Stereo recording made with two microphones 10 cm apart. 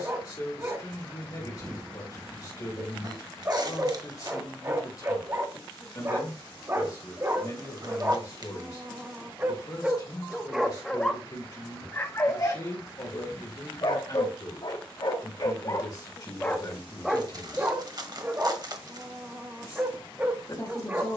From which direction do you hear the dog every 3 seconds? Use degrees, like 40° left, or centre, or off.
30° right, 30° right, 30° right, centre, 40° left, 20° left, 20° right.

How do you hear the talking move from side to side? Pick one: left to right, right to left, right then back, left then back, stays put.
stays put.